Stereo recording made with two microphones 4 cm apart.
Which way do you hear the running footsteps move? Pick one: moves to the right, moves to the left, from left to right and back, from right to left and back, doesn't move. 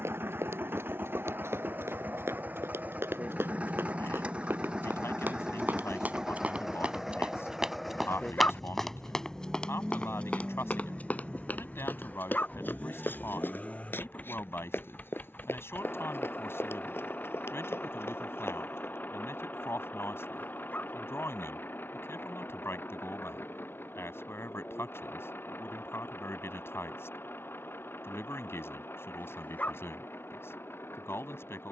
moves to the left.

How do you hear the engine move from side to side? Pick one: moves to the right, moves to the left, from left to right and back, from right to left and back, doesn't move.
moves to the left.